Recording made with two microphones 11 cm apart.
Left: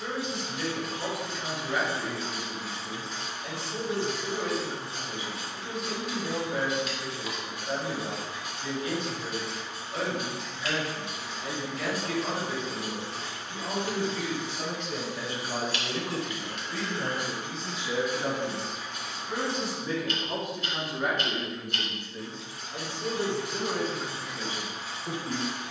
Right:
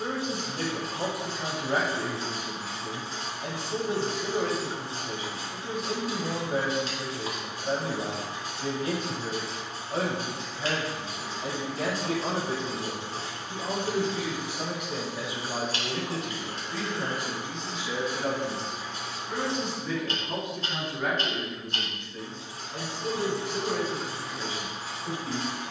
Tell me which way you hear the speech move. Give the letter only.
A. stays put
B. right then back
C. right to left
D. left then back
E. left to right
C.